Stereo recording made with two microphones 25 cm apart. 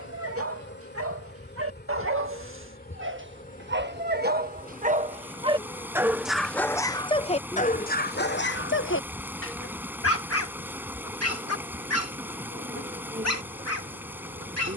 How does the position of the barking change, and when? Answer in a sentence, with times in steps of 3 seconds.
In this clip you hear the barking on the right from 0 s and on the left from 6 s.